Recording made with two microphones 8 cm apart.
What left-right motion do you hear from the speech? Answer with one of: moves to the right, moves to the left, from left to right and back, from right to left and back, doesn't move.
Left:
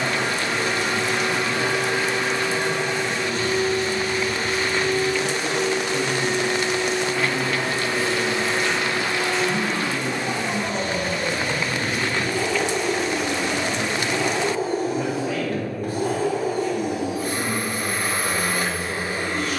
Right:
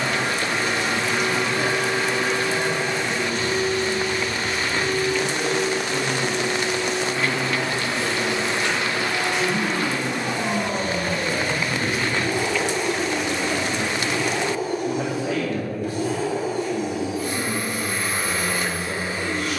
doesn't move.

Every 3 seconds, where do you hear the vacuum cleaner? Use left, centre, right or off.
right, right, right, right, centre, left, left.